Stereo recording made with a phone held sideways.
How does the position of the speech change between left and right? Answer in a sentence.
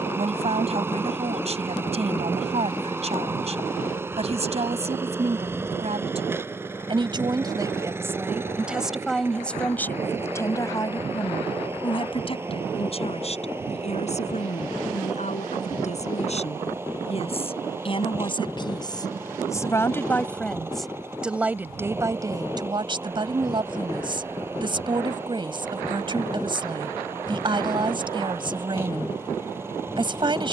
In this clip you hear the speech move from right to left and back again.